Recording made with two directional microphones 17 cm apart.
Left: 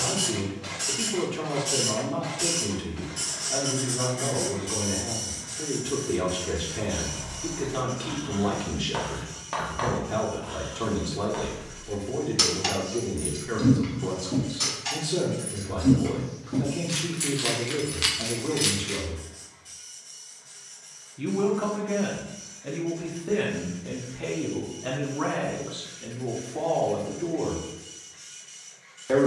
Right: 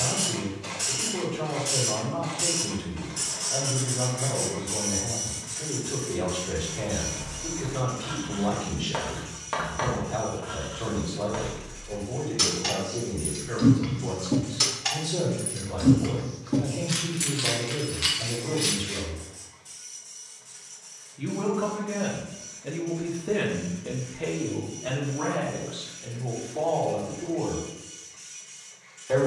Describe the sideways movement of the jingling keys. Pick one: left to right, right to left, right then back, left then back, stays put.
right then back.